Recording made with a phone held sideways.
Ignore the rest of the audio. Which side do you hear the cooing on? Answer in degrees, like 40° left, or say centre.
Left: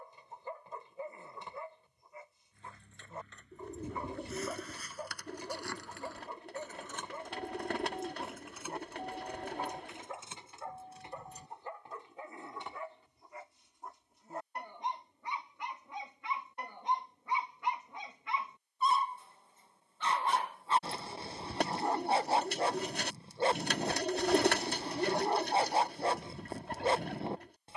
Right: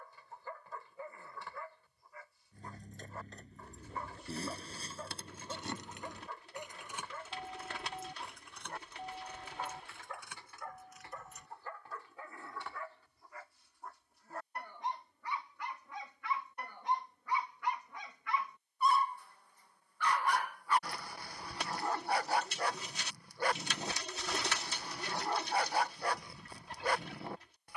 60° left.